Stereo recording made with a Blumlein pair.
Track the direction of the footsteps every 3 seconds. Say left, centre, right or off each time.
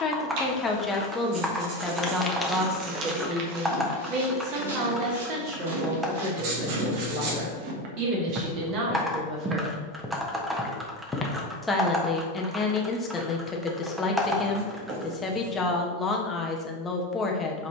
centre, right, right, centre, off, off.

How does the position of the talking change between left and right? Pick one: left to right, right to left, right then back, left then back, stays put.
right then back.